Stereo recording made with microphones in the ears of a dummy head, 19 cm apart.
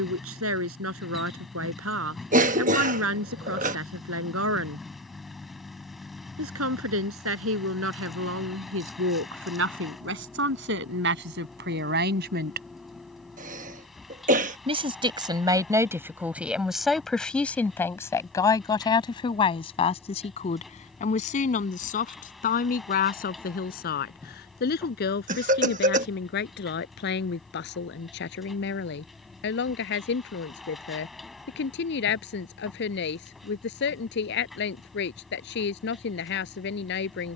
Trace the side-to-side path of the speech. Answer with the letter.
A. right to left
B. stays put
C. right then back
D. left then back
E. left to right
A.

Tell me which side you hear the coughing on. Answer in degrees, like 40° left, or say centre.
40° right.